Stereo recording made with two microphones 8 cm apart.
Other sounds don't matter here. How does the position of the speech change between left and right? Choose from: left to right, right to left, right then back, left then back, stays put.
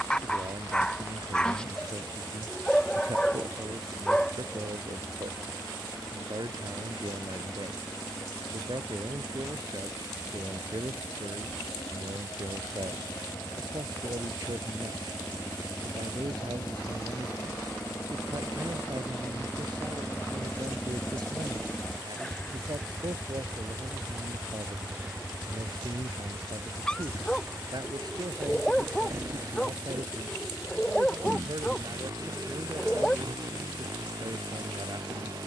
stays put.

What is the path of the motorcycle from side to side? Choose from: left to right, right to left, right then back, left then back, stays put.
left to right.